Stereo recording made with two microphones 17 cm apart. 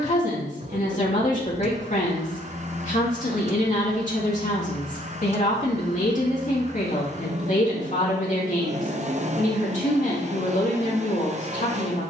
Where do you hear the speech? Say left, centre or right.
left.